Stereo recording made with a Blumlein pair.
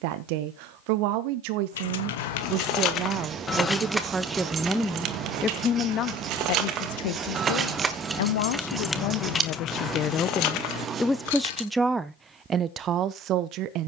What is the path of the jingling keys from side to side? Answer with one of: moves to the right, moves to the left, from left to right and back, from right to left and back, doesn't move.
from left to right and back.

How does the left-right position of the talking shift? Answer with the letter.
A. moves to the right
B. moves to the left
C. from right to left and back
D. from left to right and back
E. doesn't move
C.